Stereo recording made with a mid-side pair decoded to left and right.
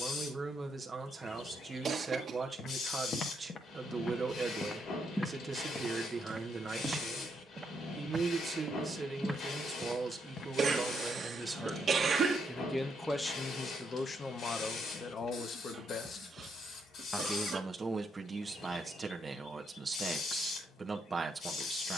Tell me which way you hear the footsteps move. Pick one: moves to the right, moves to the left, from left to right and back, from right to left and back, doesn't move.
from left to right and back.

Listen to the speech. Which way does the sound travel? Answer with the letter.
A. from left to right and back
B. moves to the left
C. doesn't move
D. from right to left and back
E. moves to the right
D.